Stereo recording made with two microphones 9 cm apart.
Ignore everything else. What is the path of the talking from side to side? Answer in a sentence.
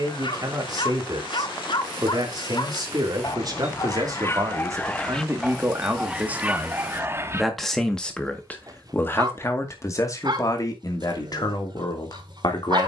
You can hear the talking go from the right side to the left.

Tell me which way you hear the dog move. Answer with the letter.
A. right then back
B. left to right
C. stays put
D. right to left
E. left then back
B.